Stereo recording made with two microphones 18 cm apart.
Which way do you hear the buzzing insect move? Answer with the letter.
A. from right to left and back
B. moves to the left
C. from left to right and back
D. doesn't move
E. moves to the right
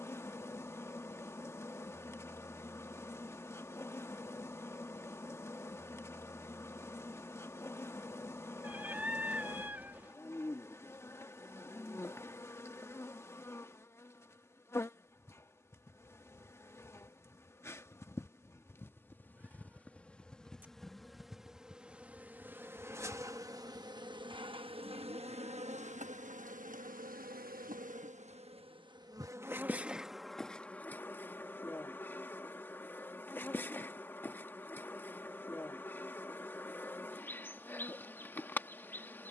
C.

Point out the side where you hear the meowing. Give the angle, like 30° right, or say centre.
10° right.